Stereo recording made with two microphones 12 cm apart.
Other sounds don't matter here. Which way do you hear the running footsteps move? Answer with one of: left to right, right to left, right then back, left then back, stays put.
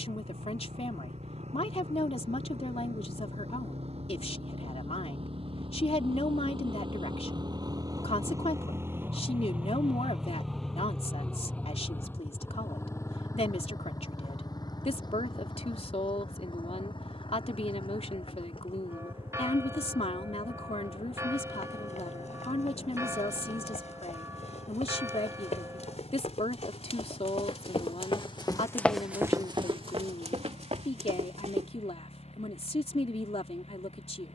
left to right.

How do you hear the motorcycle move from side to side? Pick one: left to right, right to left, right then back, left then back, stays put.
right to left.